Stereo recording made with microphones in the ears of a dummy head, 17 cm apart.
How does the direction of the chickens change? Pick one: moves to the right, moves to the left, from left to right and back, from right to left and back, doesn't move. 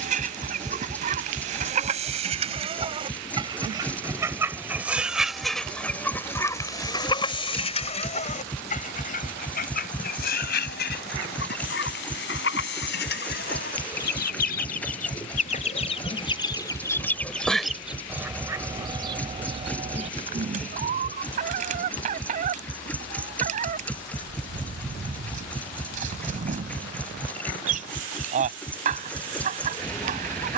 from right to left and back.